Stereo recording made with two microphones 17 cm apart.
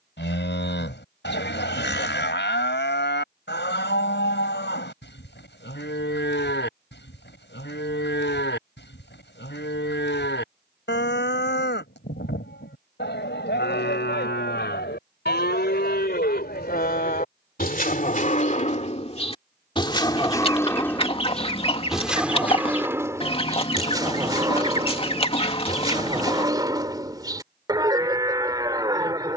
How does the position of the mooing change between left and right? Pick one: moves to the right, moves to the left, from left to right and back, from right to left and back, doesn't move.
moves to the right.